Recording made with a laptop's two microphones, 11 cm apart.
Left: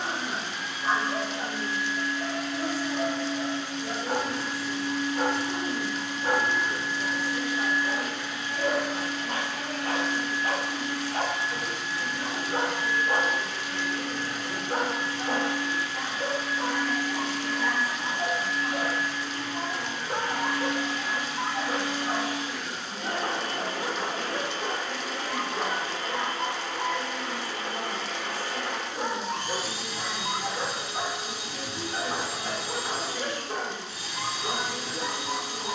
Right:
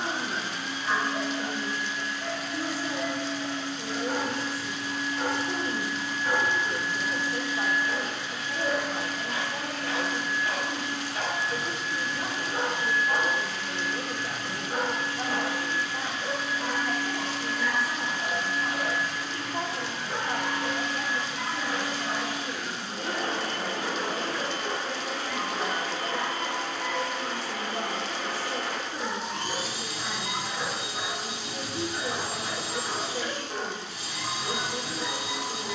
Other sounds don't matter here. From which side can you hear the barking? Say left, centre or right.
left.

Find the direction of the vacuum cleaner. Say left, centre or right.
right.